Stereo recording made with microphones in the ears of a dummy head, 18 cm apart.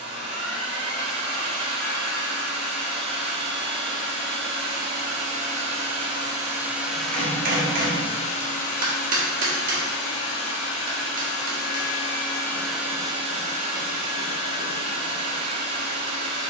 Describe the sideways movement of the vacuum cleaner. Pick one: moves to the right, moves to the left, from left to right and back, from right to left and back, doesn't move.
from right to left and back.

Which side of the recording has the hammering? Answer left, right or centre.
right.